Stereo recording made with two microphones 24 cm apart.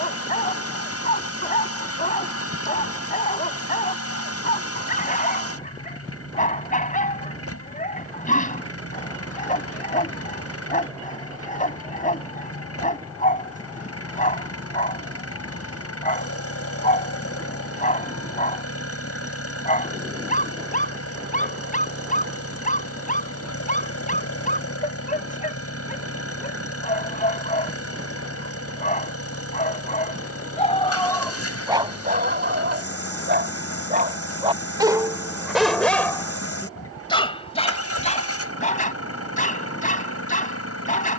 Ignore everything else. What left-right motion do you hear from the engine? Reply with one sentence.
You can hear the engine stay in one place.